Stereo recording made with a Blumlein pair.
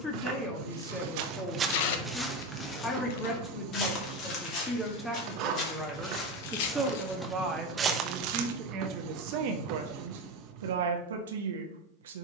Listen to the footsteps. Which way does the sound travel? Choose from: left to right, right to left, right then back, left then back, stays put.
left then back.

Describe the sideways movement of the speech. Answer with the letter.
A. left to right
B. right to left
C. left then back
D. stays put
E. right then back
A.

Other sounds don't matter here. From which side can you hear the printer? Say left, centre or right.
right.